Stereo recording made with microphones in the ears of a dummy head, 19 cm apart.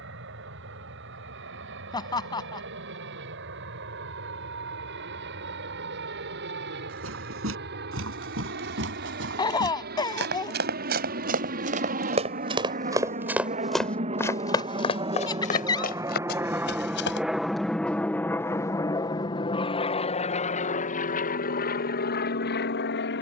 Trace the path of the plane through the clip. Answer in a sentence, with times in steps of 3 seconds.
In this clip you hear the plane on the right from 0 s, in the centre from 15 s and on the left from 18 s.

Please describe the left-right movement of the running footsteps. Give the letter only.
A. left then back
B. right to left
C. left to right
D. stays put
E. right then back
B.